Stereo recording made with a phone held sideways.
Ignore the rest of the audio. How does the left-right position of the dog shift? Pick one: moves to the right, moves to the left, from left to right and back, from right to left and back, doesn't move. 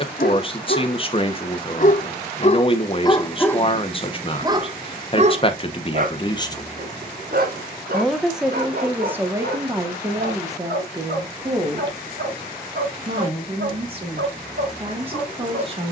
moves to the right.